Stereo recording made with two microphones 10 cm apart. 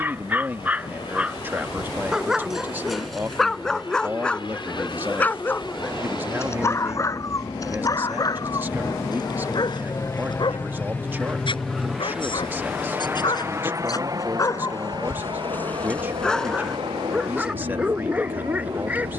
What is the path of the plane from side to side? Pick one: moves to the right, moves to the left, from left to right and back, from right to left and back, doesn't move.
moves to the right.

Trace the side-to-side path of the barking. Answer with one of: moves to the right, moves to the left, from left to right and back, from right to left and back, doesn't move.
from right to left and back.